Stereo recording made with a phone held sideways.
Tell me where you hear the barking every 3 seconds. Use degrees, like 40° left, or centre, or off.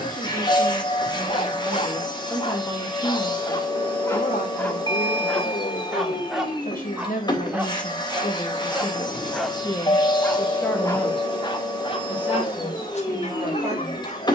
40° left, 20° left, 10° right, 10° left, 50° left.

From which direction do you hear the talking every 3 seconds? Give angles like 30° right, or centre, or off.
10° right, 70° left, 60° left, 20° left, 20° right.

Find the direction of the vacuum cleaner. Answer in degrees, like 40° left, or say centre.
30° left.